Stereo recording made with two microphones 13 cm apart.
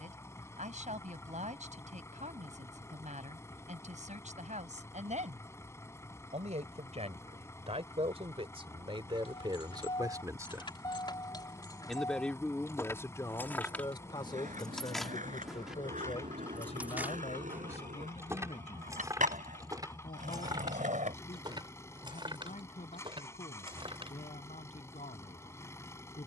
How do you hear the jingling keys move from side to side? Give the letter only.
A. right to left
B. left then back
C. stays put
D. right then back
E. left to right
E.